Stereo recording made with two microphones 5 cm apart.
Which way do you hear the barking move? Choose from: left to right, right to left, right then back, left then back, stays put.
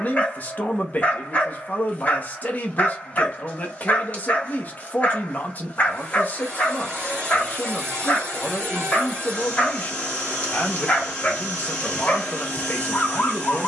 stays put.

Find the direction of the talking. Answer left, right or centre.
left.